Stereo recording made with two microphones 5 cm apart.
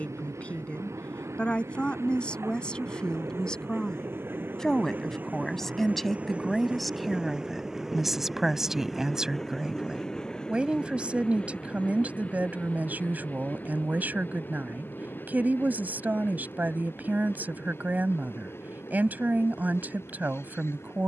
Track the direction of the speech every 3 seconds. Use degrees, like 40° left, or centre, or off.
20° left, 10° left, centre, 20° right, 30° right, 40° right, 40° right.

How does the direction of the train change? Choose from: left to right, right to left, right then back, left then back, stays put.
right to left.